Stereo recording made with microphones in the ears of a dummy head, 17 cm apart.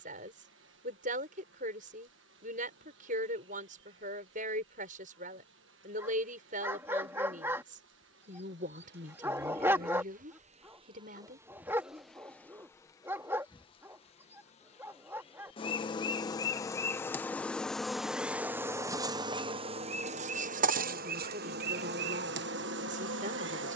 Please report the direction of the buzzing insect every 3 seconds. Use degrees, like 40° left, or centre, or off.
70° right, 70° right, 70° right, 30° right, 20° left, 20° left, 30° right, 60° right.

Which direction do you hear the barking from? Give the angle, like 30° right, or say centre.
10° right.